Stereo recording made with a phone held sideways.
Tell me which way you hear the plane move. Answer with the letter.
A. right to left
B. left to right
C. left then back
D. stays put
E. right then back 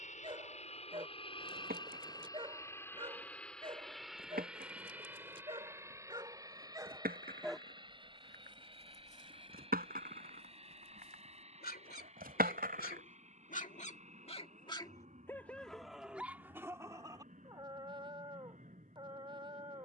B.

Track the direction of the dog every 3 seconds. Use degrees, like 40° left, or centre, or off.
40° right, 30° right, centre, 70° left, 50° left, 10° right, 30° right.